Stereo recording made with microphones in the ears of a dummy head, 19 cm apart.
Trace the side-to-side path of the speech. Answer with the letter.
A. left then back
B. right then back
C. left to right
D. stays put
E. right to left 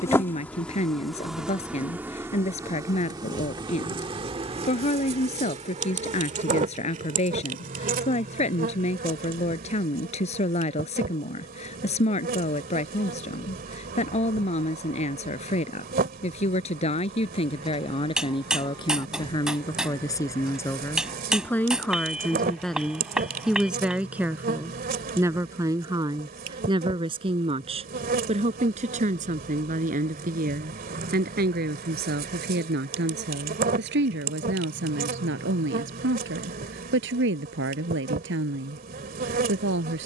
C.